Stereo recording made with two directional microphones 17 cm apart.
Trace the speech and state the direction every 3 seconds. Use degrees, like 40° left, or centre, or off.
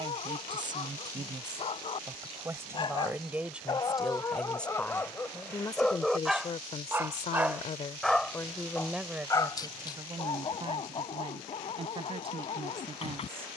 20° right, centre, 30° left, 20° right, 30° right.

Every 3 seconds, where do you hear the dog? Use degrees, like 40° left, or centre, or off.
40° left, 20° left, centre, 30° left, 40° left.